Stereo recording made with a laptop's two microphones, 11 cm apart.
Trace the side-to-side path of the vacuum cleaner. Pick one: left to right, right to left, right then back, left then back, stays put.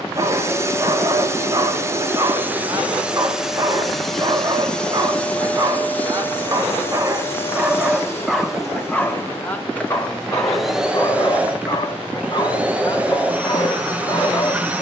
left then back.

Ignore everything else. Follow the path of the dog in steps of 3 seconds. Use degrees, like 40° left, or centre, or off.
30° right, 30° right, 10° right, 30° left, 40° left.